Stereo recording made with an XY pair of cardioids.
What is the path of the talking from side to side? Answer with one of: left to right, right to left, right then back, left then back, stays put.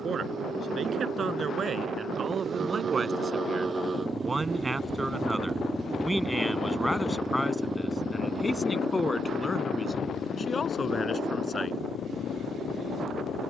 right to left.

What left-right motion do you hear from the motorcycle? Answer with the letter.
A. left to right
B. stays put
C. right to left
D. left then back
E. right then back
C.